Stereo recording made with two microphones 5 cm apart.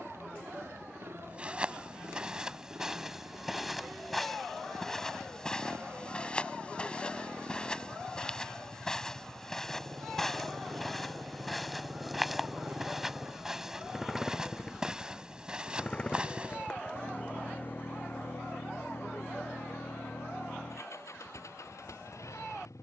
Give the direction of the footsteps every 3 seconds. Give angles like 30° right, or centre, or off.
10° right, 10° left, 20° left, 10° left, 10° right, 20° right, off, off.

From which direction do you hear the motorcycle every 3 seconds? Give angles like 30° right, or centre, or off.
60° right, 50° right, 50° right, 30° right, 10° right, 30° left, 60° left, 70° left.